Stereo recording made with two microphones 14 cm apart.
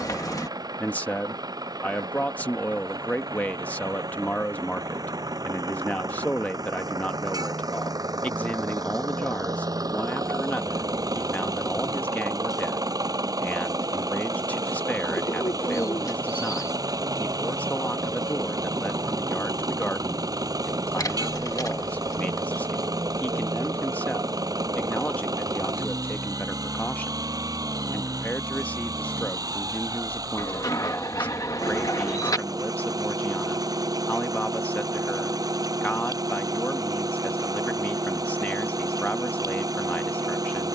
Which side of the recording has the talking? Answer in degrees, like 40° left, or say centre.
10° left.